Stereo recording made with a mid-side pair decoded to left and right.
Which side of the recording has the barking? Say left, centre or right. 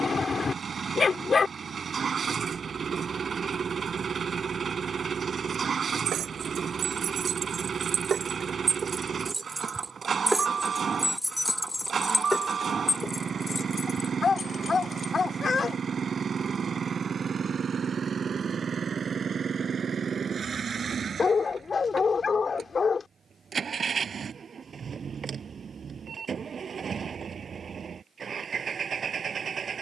left.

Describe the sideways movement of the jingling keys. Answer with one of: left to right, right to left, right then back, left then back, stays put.
right to left.